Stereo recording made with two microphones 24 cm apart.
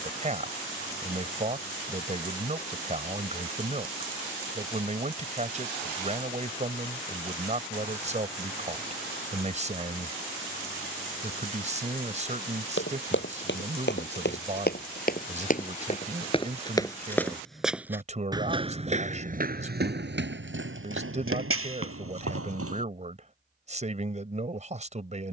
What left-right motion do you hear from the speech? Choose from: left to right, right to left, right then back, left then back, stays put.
stays put.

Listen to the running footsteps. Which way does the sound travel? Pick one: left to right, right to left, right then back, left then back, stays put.
left to right.